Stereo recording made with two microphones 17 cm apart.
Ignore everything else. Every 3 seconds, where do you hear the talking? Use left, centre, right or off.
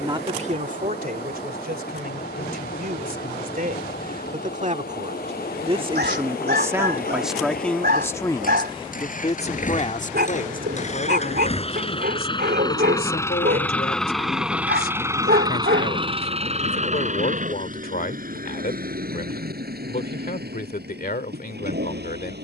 right, right, centre, left, left, left, left, left.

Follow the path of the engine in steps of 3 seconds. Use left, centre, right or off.
left, left, left, left, centre, right, right, right.